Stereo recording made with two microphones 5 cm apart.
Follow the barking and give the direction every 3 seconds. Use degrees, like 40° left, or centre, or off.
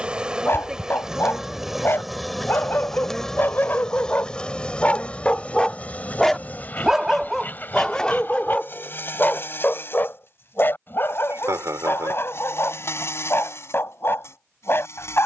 50° left, 30° left, 10° left, 40° left, 50° left.